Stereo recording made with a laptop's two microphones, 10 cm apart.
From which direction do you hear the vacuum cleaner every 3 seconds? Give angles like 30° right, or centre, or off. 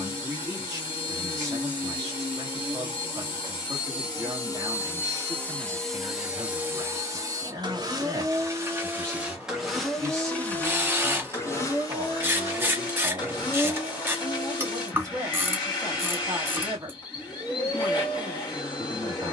50° left, 30° left, 30° right, 10° left, 40° left, 50° left, 50° left.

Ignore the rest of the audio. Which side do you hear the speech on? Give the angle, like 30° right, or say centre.
30° right.